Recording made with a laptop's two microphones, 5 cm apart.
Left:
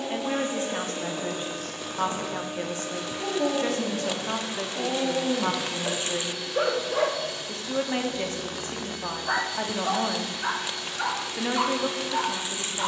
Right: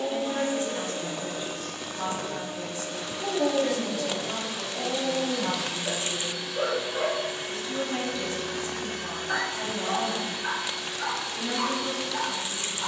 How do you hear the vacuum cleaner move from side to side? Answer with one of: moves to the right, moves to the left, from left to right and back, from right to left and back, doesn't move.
from left to right and back.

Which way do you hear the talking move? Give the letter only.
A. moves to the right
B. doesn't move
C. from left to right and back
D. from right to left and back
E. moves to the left
B.